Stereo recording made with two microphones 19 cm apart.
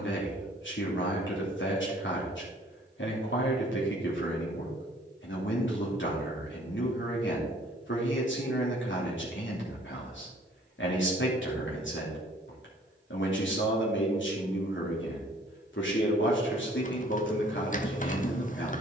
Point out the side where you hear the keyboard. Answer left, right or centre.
left.